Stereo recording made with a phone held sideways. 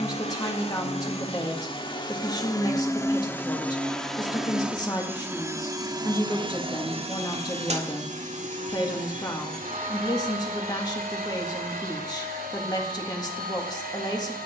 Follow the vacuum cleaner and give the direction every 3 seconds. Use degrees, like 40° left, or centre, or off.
30° left, centre, 40° right, 60° right, 70° right.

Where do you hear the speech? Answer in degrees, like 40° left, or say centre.
20° left.